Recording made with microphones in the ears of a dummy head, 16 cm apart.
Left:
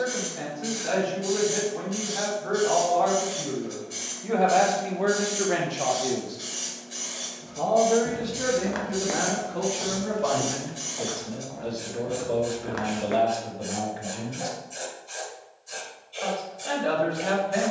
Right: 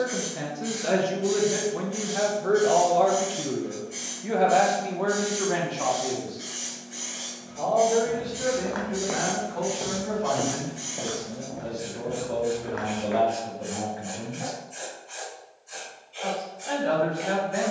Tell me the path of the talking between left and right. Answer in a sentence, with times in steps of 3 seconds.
You can hear the talking on the right from 0 s, in the centre from 3 s and on the left from 6 s.